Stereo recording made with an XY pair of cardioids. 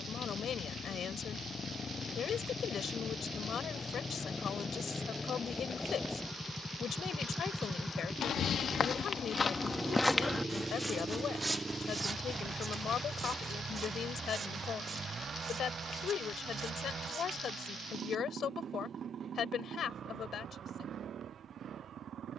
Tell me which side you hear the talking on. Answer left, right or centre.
left.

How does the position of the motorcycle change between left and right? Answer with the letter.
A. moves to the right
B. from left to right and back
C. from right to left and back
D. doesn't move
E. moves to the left
A.